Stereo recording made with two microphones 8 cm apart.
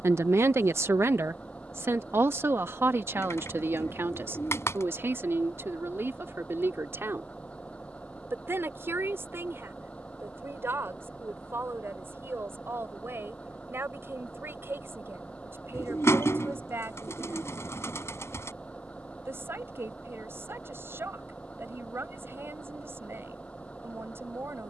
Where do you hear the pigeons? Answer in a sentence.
You can hear the pigeons on the left.